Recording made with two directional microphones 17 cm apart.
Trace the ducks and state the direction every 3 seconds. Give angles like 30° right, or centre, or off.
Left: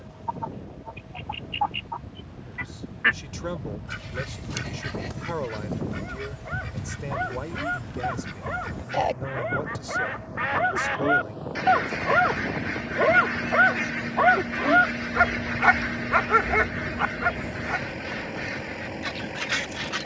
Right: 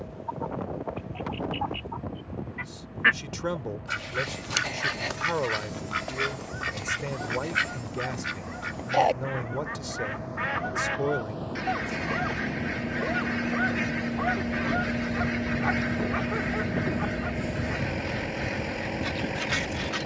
20° left, 40° right, 50° right, 10° left, 20° left, 20° left, 20° left.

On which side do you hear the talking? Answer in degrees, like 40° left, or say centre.
10° right.